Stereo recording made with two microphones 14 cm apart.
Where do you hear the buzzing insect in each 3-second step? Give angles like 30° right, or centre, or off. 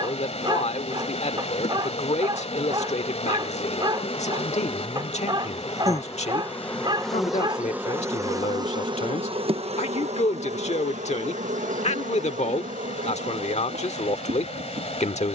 50° left, 40° left, 10° right, 60° right, 80° right.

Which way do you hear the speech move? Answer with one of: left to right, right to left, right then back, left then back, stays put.
stays put.